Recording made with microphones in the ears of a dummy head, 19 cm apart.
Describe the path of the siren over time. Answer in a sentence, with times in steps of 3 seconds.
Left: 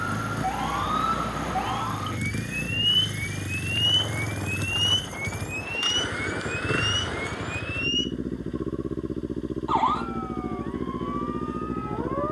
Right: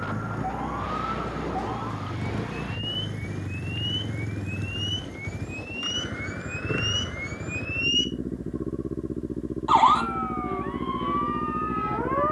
You can hear the siren on the left from 0 s, in the centre from 6 s and on the right from 9 s.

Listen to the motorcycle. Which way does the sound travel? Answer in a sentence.
In this clip you hear the motorcycle stay in one place.